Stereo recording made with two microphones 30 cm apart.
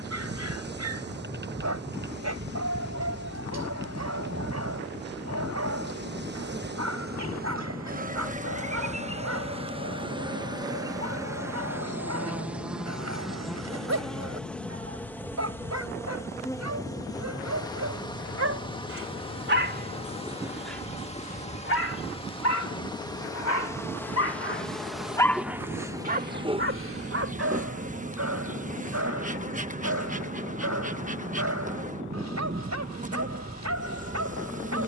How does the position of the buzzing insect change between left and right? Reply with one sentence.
In this clip you hear the buzzing insect move from right to left and back again.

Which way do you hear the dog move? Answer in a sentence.
You can hear the dog move from right to left and back again.